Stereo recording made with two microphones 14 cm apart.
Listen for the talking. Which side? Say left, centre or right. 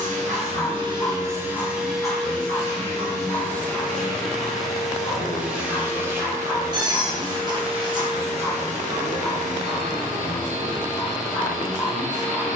left.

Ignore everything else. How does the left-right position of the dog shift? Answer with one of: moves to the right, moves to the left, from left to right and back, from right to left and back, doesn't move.
doesn't move.